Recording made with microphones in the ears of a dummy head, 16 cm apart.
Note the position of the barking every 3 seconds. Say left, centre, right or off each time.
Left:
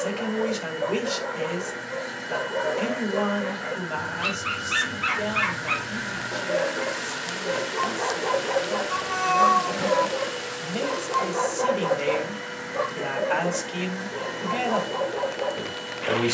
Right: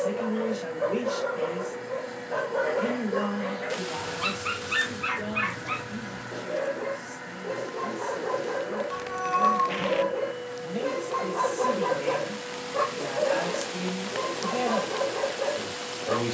right, centre, left, centre, right, right.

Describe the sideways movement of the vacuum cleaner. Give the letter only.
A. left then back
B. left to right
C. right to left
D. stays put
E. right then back
D.